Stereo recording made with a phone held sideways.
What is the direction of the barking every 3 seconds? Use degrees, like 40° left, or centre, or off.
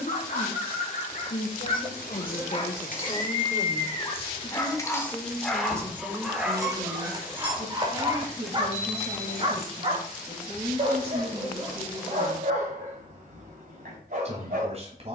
50° left, 20° left, 20° right, 50° right, 60° right.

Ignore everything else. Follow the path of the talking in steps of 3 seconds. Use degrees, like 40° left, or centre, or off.
60° left, 10° left, 30° right, 40° right, 40° right.